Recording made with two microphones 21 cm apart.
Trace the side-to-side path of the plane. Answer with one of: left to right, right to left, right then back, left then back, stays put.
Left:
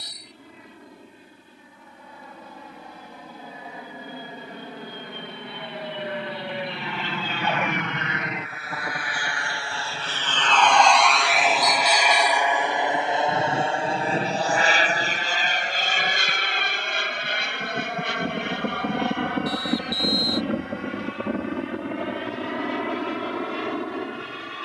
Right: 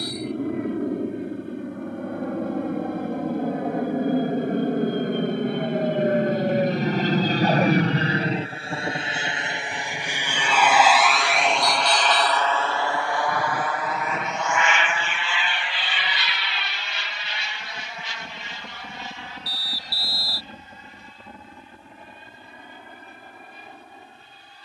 right to left.